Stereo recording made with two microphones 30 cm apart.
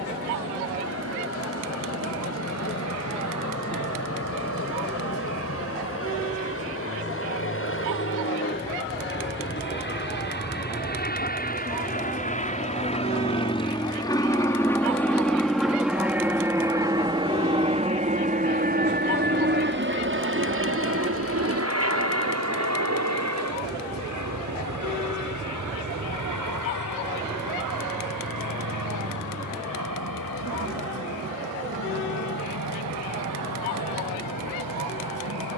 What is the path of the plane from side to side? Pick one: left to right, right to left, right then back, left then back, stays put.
left to right.